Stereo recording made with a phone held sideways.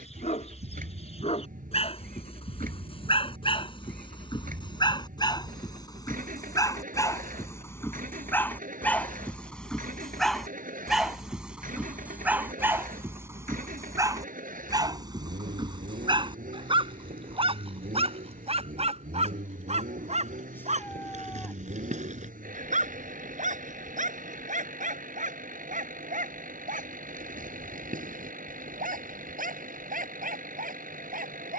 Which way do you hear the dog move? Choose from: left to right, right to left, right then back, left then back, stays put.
left to right.